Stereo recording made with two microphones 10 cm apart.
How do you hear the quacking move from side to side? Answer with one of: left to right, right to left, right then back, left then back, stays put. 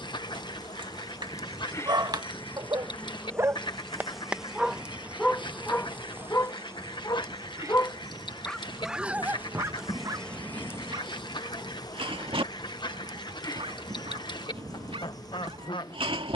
stays put.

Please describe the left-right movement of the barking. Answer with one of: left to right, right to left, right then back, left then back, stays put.
left then back.